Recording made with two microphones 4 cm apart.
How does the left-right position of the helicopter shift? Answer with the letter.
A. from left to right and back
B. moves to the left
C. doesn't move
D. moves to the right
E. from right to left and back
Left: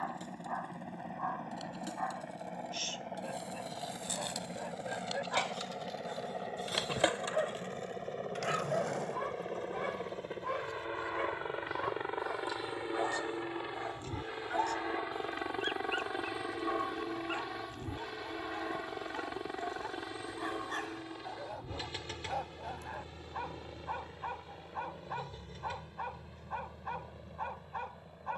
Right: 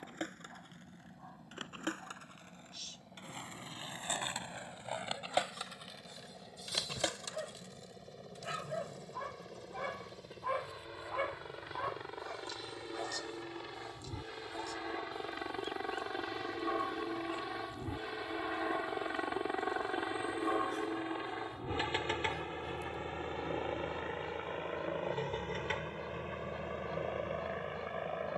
D.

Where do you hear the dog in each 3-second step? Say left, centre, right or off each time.
left, left, left, centre, left, left, left, left, left, left.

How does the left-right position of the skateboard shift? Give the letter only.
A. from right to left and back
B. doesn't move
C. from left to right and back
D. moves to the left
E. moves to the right
D.